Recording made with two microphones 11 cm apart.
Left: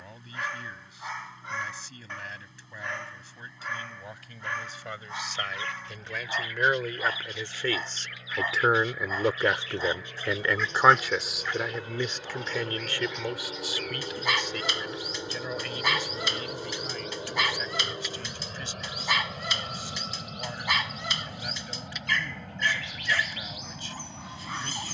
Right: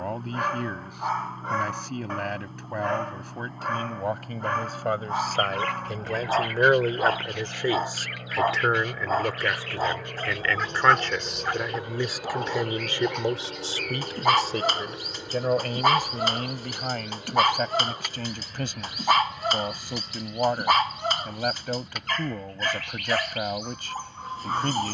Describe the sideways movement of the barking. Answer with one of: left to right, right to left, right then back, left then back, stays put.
stays put.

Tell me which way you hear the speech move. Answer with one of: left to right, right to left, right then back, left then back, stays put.
left then back.